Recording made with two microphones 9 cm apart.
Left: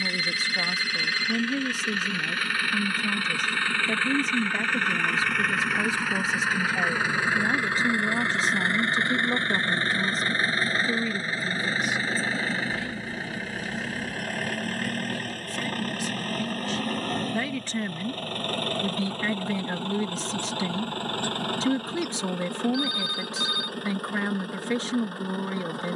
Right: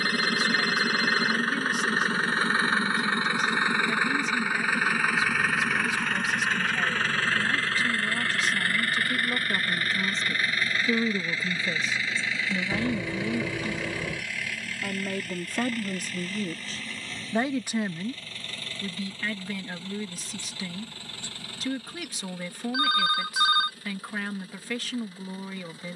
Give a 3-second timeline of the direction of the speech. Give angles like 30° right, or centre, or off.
30° left, 30° left, 30° left, centre, 50° right, 40° right, 30° left, 30° left, 30° left.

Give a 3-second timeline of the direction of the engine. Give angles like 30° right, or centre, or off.
40° right, 10° right, 20° left, 30° left, 40° left, 50° left, 60° left, 60° left, 60° left.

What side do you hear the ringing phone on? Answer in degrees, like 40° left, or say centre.
60° right.